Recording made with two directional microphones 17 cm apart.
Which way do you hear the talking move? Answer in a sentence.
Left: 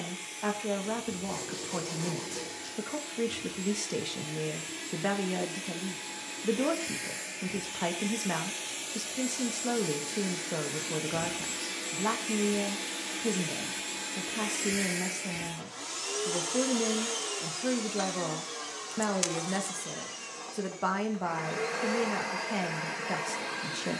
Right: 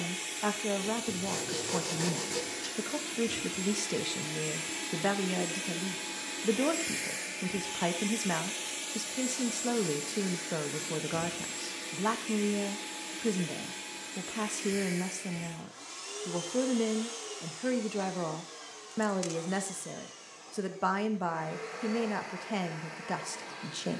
In this clip you hear the talking stay in one place.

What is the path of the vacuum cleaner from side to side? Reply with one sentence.
You can hear the vacuum cleaner move to the left.